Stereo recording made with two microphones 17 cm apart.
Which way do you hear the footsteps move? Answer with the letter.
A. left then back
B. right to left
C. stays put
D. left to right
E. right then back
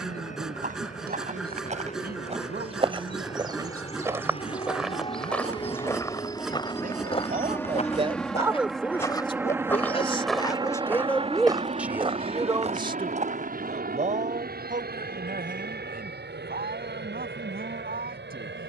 A.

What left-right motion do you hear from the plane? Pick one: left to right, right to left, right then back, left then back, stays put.
left to right.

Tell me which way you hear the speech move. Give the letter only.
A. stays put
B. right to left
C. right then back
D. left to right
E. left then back
E.